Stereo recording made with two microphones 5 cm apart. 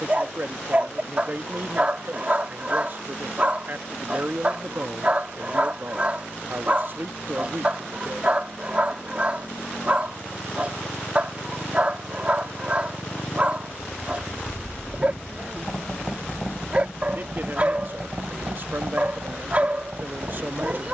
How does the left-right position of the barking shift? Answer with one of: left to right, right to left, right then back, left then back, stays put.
stays put.